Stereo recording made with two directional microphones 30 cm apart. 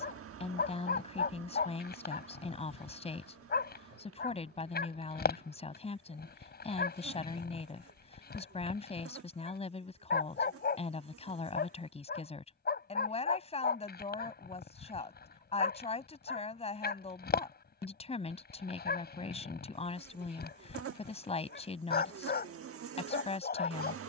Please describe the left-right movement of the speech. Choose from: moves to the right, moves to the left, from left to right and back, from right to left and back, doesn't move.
doesn't move.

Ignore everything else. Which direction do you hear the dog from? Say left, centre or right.
left.